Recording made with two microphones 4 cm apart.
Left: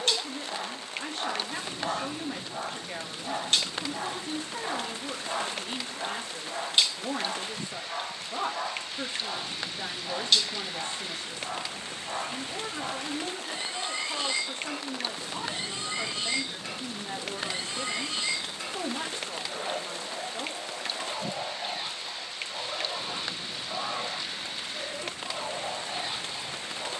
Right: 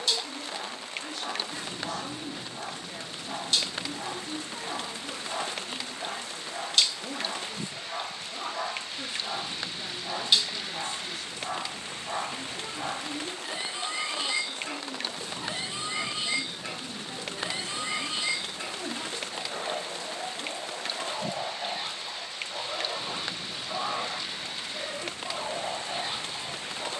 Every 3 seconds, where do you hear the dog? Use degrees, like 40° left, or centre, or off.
60° left, 50° left, 10° left, 10° right, 10° right, 10° right, 10° right, 10° right, 10° right.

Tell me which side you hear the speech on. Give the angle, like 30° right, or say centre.
40° left.